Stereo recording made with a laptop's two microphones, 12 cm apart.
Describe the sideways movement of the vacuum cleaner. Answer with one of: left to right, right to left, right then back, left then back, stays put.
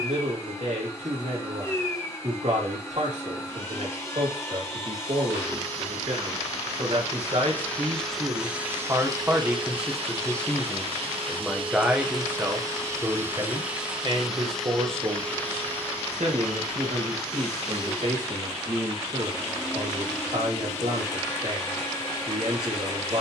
right then back.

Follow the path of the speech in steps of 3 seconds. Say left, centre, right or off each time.
right, right, right, centre, right, right, right, right.